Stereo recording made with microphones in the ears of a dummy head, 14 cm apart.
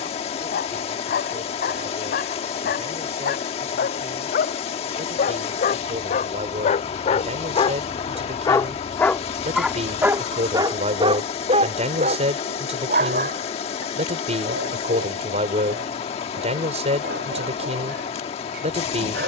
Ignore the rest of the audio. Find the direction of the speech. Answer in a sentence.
You can hear the speech on the right.